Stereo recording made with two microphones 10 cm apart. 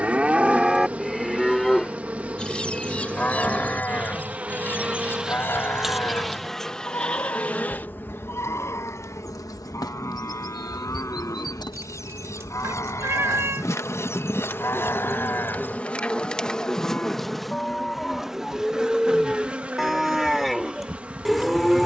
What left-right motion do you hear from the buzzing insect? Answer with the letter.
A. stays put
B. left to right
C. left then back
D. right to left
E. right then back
C.